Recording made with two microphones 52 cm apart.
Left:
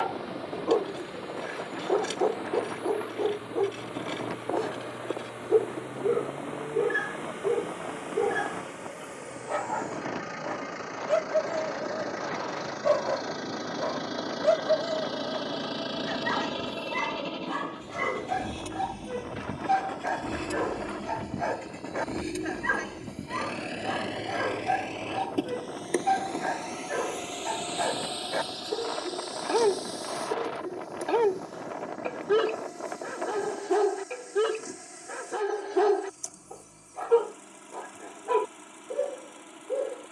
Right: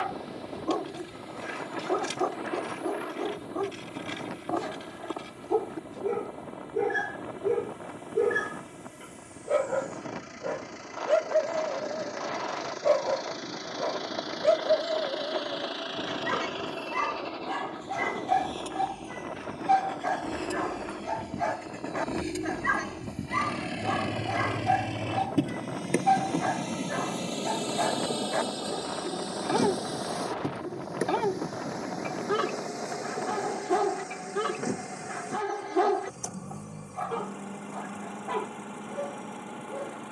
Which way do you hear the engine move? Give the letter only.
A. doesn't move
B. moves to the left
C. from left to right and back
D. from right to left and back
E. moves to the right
E.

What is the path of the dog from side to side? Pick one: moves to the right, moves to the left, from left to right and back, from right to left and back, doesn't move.
from right to left and back.